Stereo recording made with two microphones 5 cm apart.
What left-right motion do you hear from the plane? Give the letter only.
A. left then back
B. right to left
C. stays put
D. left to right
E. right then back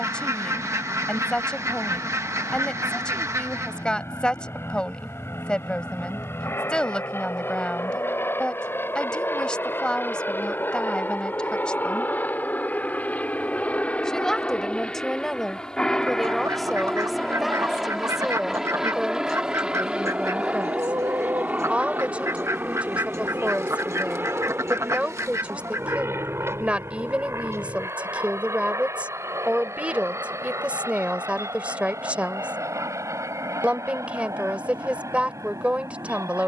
D.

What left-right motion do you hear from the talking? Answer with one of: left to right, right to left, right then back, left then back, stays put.
left to right.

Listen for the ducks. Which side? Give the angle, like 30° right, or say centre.
80° right.